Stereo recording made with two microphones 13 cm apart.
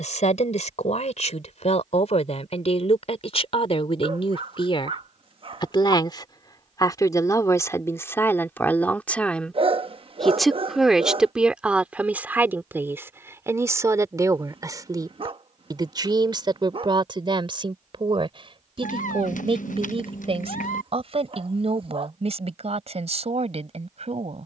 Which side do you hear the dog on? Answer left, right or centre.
right.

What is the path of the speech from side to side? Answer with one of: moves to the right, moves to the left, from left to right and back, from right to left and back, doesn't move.
moves to the right.